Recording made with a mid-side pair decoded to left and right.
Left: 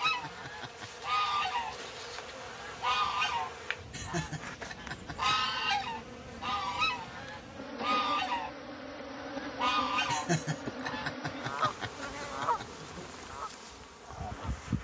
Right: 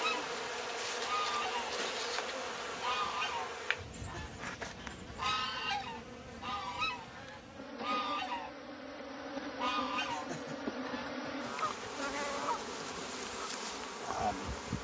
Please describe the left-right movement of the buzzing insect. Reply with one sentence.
In this clip you hear the buzzing insect move from right to left and back again.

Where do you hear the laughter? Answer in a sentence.
In this clip you hear the laughter on the left.